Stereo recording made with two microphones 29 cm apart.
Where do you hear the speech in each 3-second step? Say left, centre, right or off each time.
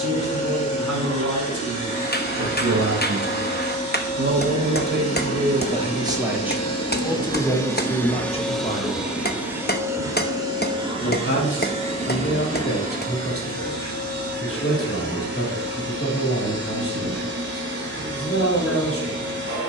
right, right, centre, left, left, left, left.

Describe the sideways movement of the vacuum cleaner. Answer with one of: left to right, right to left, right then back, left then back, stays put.
left to right.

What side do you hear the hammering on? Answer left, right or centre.
left.